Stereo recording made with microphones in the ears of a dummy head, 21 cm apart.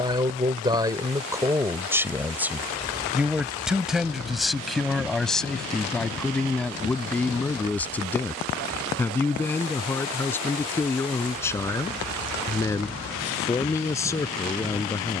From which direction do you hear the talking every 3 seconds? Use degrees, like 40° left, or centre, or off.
10° right, centre, 10° left, 10° left, 10° left.